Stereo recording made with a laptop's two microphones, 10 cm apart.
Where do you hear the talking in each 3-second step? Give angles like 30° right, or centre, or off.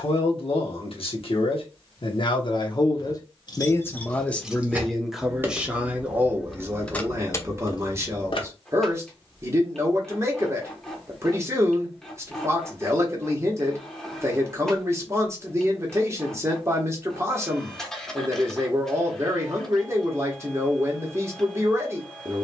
50° left, 10° left, 20° right, 30° right, 30° right, 30° right, 30° right, 30° right.